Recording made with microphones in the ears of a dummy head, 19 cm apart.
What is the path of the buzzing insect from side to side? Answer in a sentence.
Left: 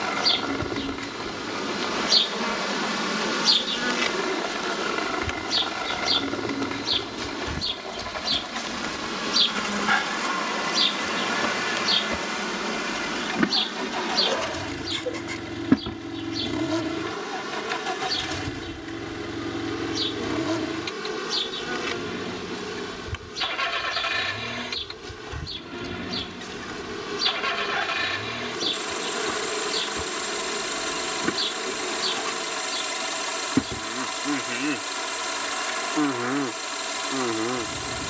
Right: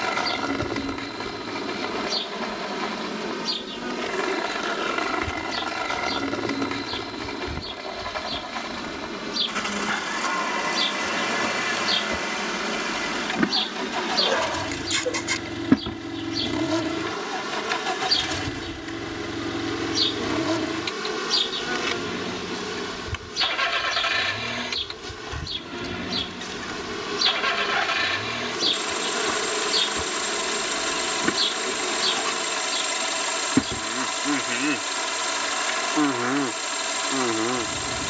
You can hear the buzzing insect go from the left side to the right.